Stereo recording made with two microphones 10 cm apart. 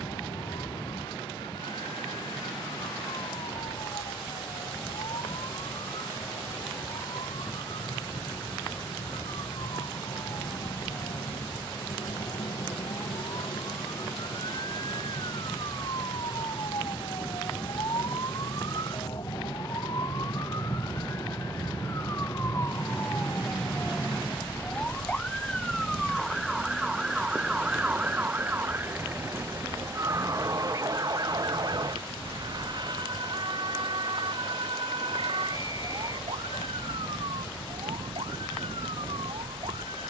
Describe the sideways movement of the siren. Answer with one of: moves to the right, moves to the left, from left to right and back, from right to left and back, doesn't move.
moves to the right.